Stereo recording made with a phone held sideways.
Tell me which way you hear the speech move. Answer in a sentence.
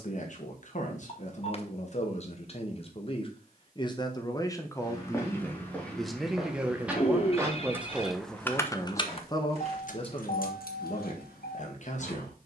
In this clip you hear the speech go right and come back.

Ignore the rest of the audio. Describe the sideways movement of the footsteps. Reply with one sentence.
In this clip you hear the footsteps move to the right.